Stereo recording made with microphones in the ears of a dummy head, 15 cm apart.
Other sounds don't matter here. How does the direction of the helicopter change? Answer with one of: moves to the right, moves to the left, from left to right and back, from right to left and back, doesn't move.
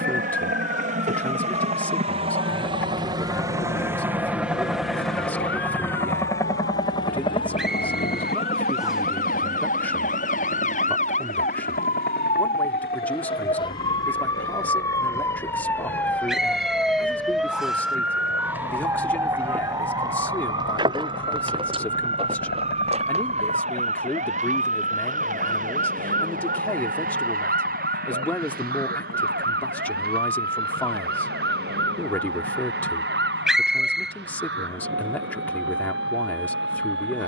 moves to the left.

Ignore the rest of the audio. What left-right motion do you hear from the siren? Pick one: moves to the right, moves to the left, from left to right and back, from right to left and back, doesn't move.
moves to the right.